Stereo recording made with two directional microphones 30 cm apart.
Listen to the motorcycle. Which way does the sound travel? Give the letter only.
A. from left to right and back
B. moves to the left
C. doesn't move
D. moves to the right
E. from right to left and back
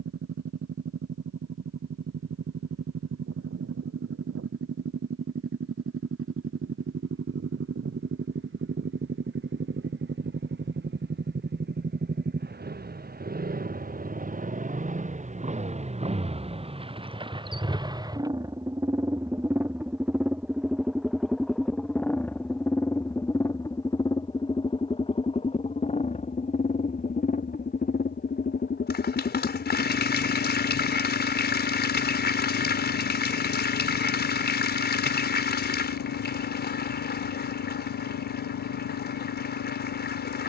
B.